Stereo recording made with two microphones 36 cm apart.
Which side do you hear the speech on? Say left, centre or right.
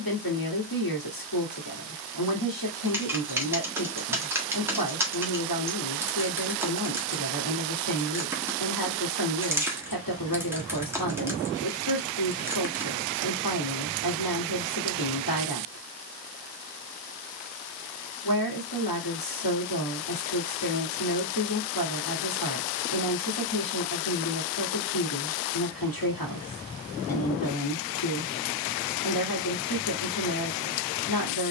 left.